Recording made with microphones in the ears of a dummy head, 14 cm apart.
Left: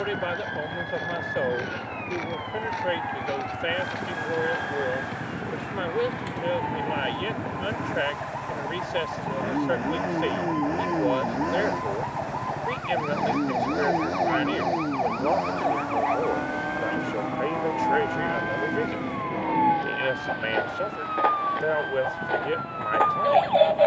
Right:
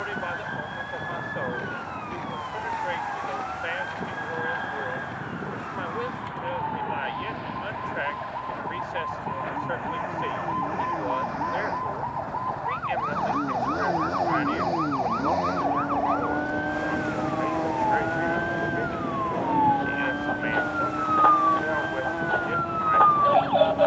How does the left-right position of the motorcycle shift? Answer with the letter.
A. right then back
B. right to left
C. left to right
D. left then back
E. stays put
C.